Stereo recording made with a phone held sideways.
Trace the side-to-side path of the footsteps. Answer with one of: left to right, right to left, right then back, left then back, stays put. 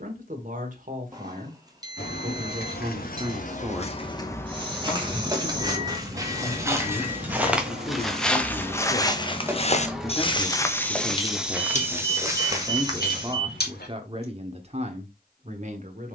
left then back.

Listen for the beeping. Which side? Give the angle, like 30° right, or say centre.
20° right.